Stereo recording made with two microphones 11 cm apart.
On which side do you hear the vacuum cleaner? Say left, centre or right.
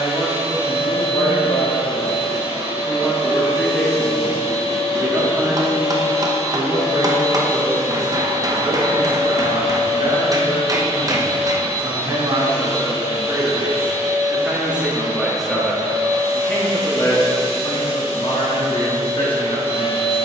right.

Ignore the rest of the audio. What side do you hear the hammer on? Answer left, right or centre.
right.